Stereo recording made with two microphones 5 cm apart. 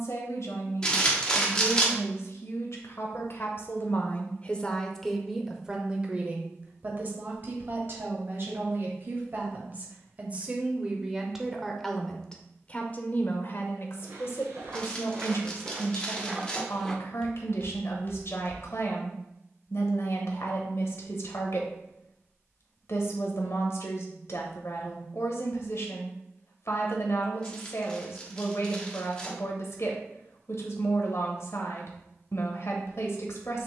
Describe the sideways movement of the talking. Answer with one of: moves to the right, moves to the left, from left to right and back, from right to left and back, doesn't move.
from left to right and back.